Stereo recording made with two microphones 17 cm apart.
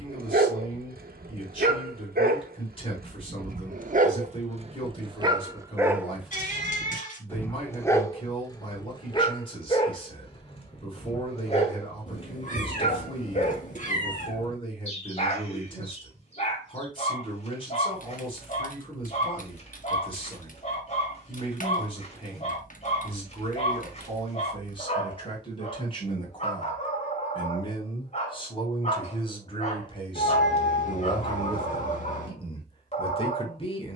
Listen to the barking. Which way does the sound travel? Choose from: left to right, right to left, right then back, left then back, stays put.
right to left.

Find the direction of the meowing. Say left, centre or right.
left.